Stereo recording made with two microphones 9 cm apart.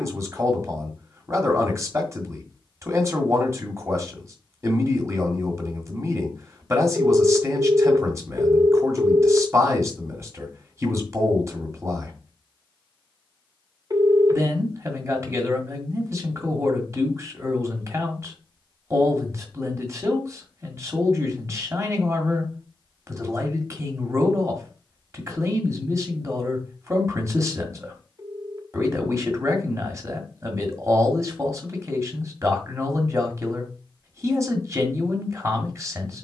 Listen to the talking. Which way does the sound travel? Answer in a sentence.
You can hear the talking stay in one place.